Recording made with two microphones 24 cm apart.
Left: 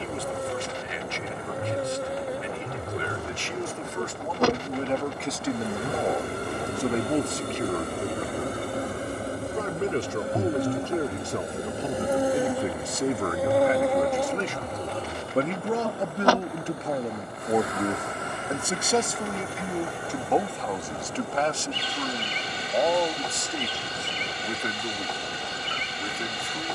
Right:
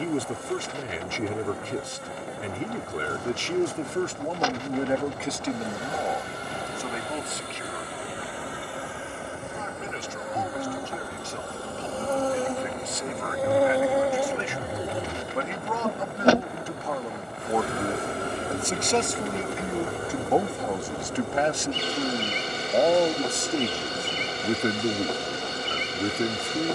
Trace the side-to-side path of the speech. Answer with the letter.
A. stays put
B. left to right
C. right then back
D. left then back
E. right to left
D.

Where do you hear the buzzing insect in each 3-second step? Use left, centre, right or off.
left, left, left, left, centre, right, right, right, right.